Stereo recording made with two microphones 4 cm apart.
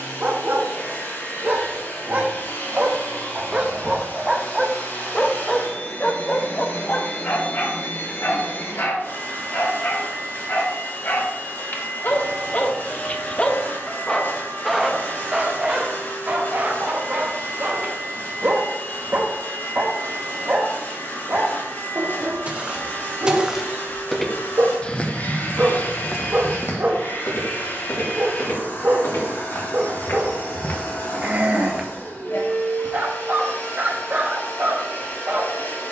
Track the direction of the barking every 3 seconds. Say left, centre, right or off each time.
right, centre, left, left, left, right, right, right, right, right, right, right.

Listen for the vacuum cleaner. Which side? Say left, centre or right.
left.